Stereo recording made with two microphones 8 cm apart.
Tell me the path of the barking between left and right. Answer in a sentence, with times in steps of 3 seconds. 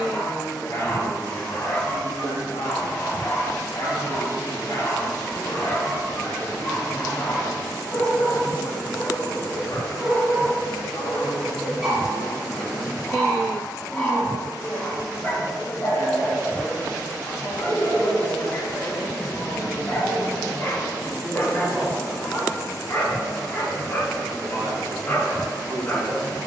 In this clip you hear the barking on the left from 0 s, in the centre from 9 s and on the left from 15 s.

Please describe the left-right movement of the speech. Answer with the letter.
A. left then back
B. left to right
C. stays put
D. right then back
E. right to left
B.